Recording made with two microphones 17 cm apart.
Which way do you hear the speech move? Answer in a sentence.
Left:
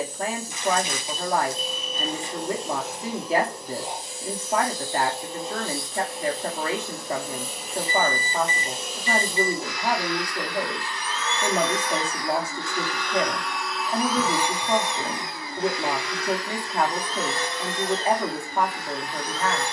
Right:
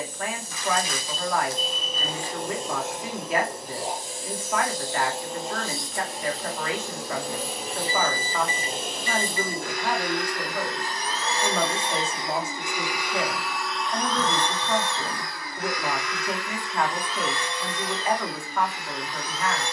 In this clip you hear the speech stay put.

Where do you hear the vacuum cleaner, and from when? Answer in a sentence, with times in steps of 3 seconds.
You can hear the vacuum cleaner on the right from 0 s, in the centre from 12 s and on the left from 15 s.